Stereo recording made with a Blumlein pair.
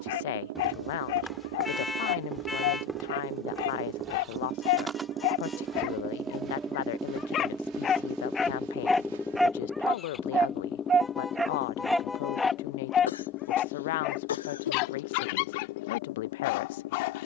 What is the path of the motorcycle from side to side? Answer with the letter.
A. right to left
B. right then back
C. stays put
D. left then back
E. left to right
A.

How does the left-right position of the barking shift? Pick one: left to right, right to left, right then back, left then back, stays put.
right then back.